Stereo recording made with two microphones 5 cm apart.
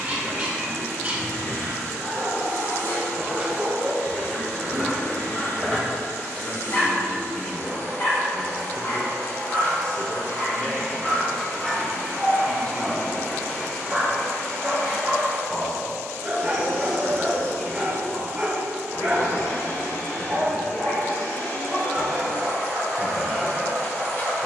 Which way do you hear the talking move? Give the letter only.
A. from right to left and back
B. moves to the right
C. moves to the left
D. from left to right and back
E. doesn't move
E.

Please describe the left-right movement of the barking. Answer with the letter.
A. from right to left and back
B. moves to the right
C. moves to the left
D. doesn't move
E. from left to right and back
A.